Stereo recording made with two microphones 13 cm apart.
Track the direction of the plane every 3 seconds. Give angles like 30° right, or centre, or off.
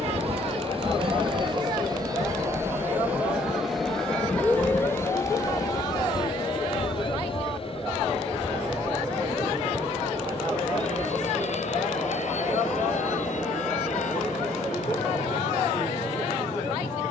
40° right, 10° left, 40° left, 50° left, 60° left, 60° left.